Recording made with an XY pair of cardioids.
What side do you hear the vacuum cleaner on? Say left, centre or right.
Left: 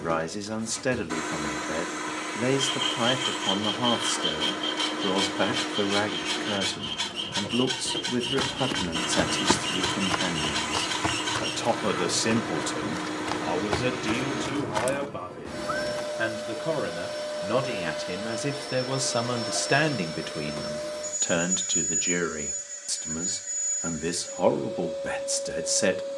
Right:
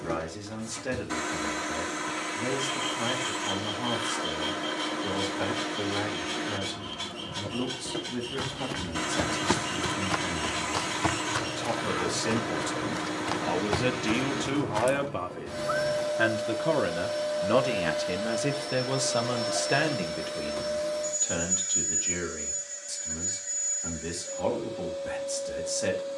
centre.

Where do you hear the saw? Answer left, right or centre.
left.